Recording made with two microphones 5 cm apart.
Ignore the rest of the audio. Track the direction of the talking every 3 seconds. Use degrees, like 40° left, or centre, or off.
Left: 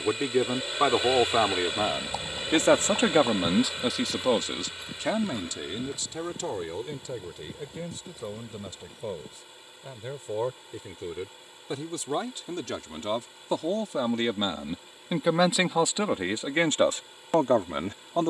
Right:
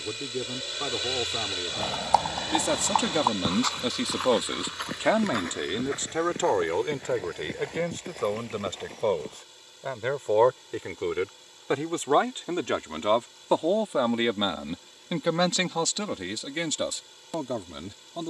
60° left, 10° right, 60° right, 50° right, 30° right, 30° left.